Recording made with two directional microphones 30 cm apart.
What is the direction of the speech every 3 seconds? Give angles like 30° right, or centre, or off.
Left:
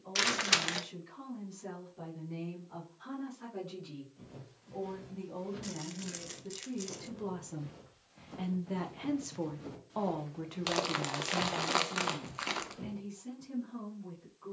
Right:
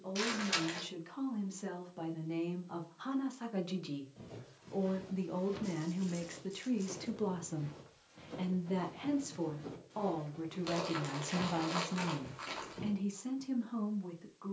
70° right, 50° right, 20° right, centre, 60° right.